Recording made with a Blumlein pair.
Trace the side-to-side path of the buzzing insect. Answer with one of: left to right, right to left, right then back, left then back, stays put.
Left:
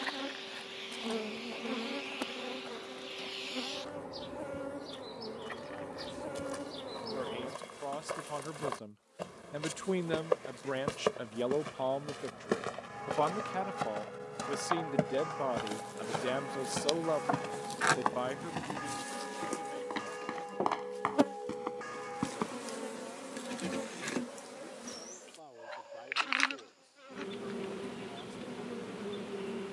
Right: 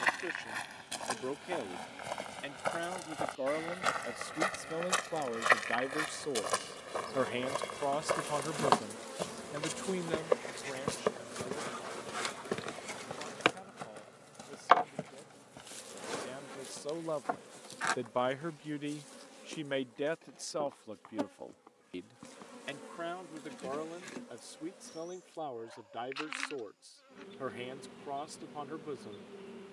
right then back.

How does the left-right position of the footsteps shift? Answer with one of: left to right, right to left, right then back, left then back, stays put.
right to left.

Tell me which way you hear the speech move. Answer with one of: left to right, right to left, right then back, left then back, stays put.
left then back.